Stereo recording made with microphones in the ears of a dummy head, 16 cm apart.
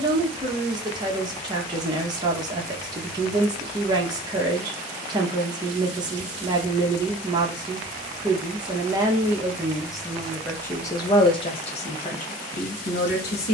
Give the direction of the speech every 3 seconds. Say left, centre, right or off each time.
right, right, right, centre, left.